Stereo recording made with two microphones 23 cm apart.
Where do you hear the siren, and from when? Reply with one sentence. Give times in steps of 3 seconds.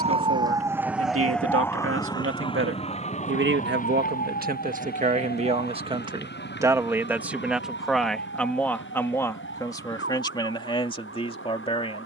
You can hear the siren in the centre from 0 s and on the left from 3 s.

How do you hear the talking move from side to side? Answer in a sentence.
In this clip you hear the talking move to the left.